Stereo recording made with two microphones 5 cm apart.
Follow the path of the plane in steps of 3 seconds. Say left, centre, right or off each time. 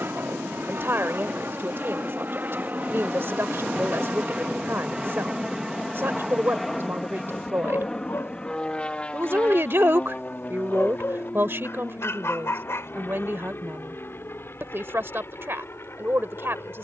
right, right, centre, left, left, left.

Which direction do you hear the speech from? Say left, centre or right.
right.